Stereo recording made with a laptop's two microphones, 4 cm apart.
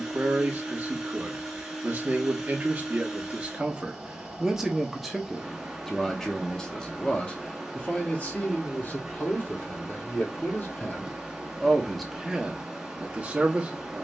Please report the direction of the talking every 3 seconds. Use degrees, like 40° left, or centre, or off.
30° right, 10° right, 30° left, 40° left, 20° right.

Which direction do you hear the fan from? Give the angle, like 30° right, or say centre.
10° right.